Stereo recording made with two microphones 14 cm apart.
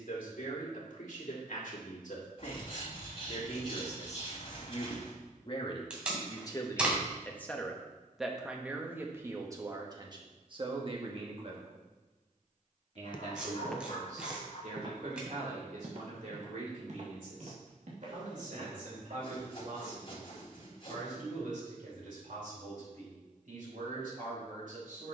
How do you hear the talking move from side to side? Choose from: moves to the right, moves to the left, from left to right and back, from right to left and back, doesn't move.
moves to the right.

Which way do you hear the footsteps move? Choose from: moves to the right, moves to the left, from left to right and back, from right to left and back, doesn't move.
moves to the right.